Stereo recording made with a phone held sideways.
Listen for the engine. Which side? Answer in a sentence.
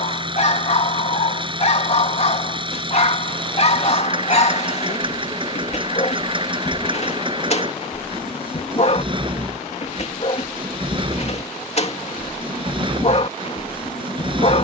You can hear the engine on the right.